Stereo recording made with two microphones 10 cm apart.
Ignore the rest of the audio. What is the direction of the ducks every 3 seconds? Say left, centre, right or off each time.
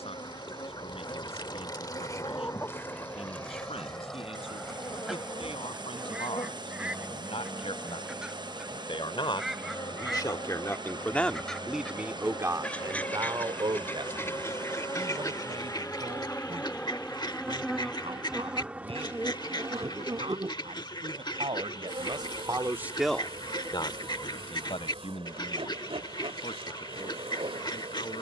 left, centre, centre, centre, left, left, left, left, left, left.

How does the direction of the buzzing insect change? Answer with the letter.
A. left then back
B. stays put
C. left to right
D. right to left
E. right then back
C.